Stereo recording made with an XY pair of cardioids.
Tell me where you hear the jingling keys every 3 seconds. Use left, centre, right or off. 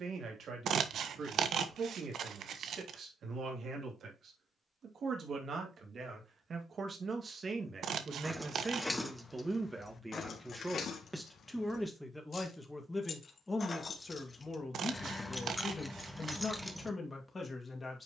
off, off, centre, left, left, centre.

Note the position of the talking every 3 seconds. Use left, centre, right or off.
right, right, right, centre, left, left.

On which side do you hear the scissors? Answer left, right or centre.
right.